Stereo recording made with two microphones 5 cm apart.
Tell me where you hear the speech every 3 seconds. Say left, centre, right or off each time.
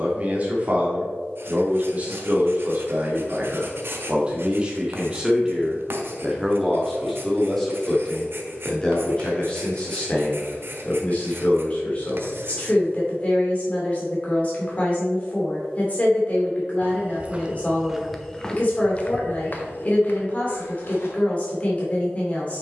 right, right, centre, left, left, left, left, left.